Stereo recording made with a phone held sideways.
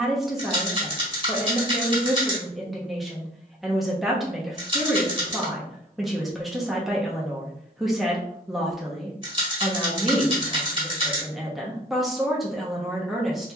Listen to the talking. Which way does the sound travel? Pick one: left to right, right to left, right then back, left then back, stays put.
stays put.